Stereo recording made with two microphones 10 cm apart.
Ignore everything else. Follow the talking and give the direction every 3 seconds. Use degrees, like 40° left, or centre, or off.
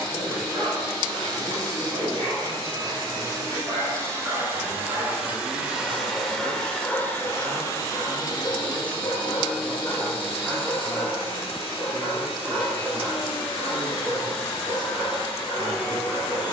80° right, 60° right, 40° right, 10° left, 40° left, 50° left.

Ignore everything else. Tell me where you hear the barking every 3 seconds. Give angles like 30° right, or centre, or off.
50° right, 30° right, 20° left, 10° left, 50° right, 50° right.